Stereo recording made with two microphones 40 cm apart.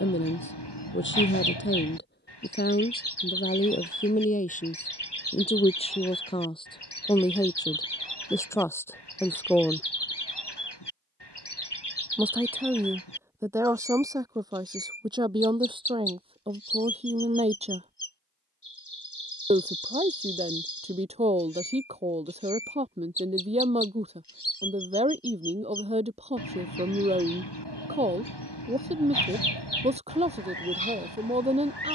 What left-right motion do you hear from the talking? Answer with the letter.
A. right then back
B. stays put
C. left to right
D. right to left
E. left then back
C.